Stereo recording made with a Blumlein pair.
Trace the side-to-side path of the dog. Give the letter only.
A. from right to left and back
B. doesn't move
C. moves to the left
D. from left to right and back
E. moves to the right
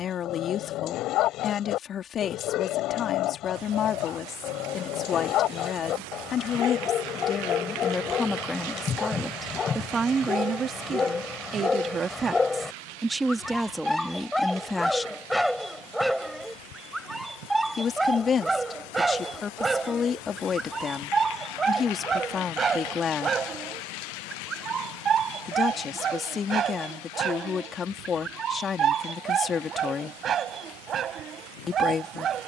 E.